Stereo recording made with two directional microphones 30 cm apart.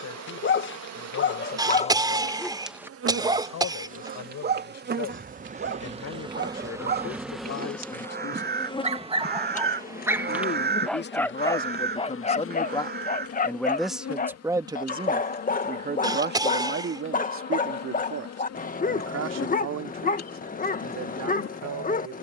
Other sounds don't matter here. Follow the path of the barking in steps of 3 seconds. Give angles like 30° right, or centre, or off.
30° left, 30° right, 30° right, 10° right, 30° left, 30° left, 30° left, 30° left.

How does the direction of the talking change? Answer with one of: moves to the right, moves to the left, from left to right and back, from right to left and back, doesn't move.
moves to the right.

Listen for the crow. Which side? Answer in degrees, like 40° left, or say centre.
30° right.